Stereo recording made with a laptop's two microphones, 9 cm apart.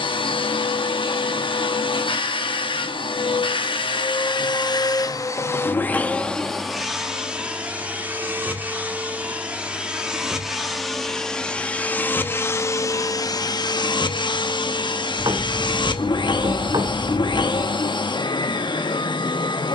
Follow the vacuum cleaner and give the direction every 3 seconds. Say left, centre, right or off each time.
left, left, centre, centre, left, left, left.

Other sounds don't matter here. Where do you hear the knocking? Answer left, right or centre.
right.